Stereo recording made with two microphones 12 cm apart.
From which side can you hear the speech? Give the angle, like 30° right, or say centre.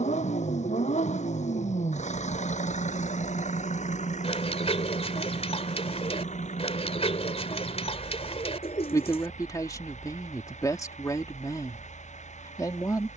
30° left.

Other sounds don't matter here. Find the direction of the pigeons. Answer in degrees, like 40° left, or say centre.
50° left.